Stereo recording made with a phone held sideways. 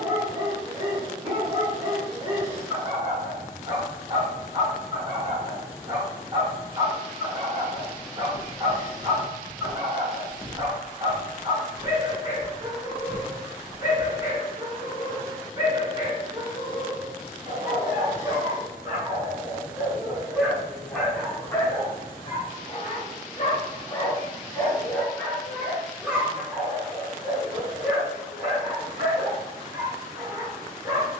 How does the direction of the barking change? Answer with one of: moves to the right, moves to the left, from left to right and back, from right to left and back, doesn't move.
from right to left and back.